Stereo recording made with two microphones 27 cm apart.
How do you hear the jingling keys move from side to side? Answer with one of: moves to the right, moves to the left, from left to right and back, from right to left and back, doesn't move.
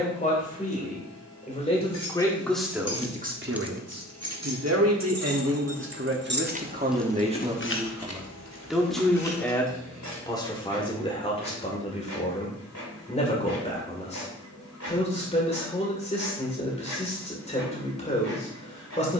from left to right and back.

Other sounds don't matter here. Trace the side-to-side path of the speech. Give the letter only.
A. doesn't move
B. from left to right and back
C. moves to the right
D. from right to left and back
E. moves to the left
B.